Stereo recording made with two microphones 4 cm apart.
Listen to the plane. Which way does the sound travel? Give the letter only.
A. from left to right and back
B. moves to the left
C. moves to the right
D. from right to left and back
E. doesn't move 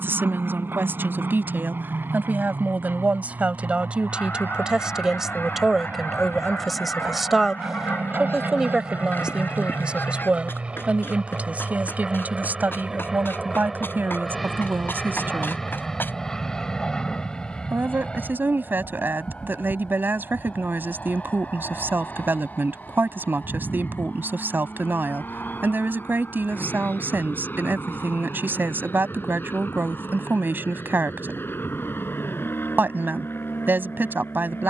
B.